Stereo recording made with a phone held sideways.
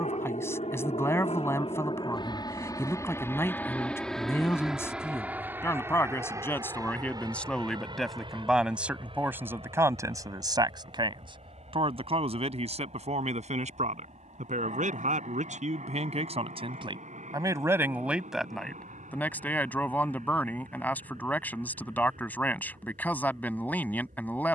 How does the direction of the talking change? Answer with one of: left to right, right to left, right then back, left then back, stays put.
right then back.